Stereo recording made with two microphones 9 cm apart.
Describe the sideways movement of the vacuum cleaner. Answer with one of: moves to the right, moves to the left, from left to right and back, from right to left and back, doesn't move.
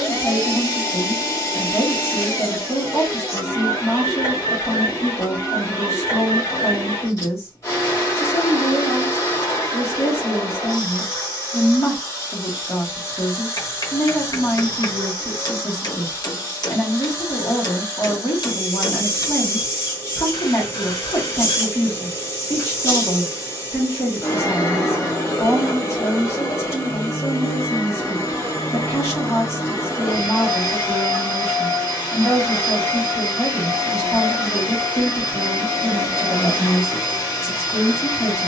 doesn't move.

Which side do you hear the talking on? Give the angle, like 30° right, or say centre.
30° left.